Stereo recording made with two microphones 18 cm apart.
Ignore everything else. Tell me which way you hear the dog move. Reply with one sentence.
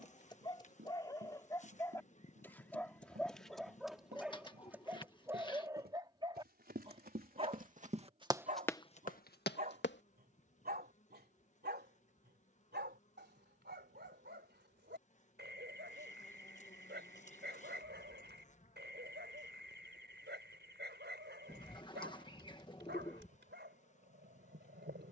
In this clip you hear the dog go from the left side to the right.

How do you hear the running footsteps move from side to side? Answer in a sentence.
You can hear the running footsteps travel towards the left.